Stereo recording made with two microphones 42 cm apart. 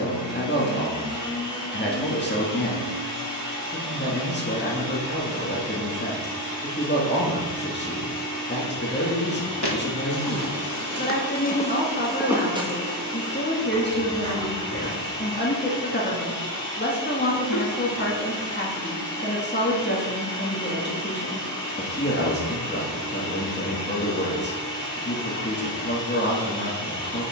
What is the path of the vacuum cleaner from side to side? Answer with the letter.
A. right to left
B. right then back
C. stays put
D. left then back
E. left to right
C.